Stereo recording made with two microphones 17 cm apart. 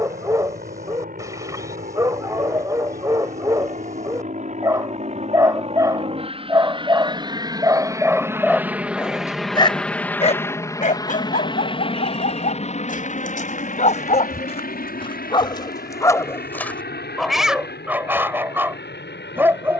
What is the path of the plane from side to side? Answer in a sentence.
You can hear the plane travel towards the left.